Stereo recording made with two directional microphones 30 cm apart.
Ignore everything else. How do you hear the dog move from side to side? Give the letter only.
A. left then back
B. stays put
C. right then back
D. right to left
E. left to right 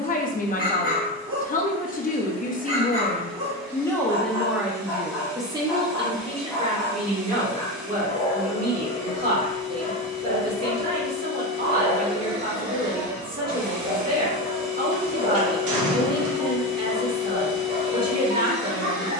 A.